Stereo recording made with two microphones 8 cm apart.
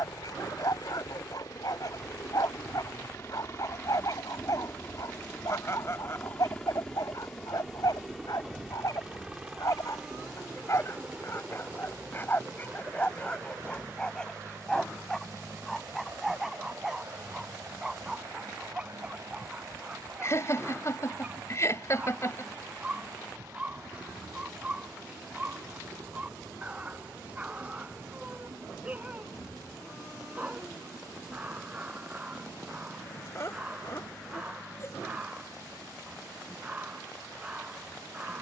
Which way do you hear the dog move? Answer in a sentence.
In this clip you hear the dog go from the left side to the right.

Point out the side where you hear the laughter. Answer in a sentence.
In this clip you hear the laughter on the left.